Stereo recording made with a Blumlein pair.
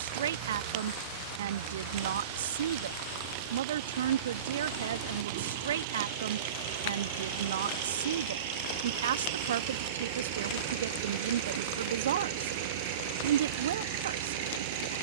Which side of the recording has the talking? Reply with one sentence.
In this clip you hear the talking on the right.